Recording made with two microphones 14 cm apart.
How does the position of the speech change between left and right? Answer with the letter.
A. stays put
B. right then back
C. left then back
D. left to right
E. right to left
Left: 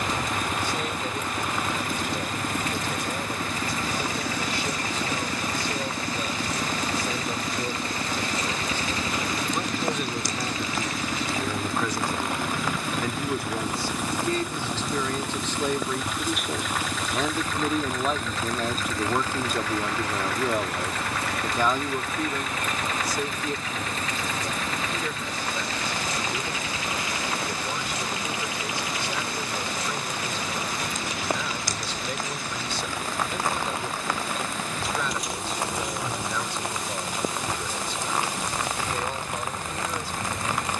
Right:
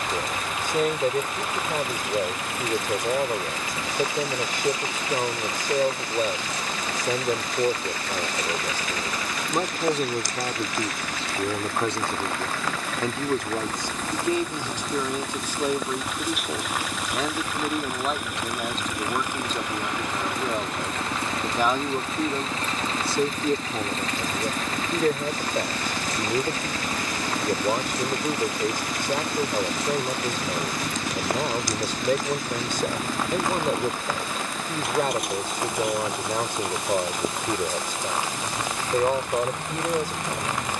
C.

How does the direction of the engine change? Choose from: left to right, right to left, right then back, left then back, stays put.
left to right.